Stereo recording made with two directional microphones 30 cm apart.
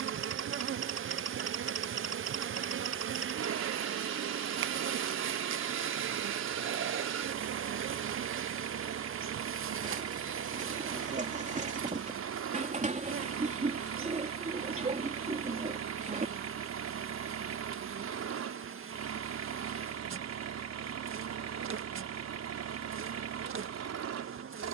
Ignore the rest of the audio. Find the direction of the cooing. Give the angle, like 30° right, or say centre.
20° right.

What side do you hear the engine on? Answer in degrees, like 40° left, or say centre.
60° right.